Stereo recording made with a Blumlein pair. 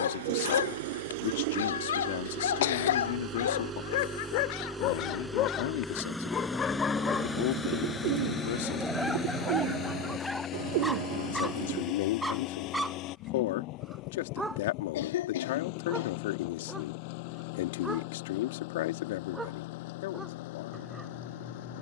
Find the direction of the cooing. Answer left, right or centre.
right.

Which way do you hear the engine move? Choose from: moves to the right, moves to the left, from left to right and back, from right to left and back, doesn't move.
moves to the left.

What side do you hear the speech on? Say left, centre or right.
left.